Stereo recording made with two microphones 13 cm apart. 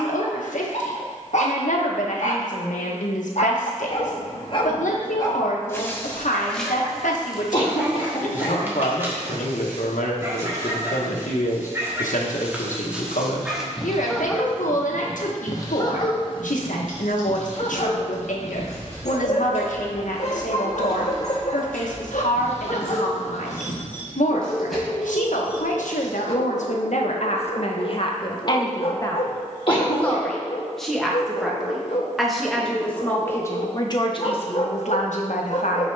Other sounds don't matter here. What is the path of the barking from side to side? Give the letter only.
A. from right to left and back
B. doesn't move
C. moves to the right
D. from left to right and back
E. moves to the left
D.